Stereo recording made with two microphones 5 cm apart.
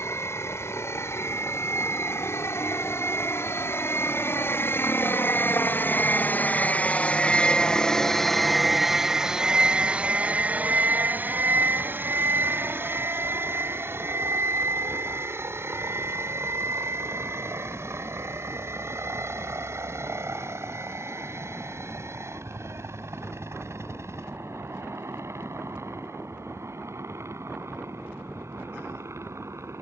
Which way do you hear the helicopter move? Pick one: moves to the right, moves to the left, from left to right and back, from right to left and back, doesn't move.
moves to the right.